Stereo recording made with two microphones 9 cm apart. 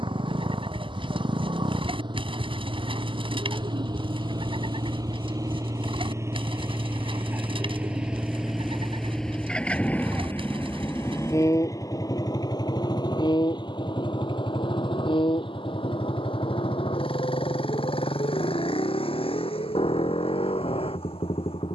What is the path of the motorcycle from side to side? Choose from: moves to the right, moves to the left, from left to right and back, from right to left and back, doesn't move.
moves to the left.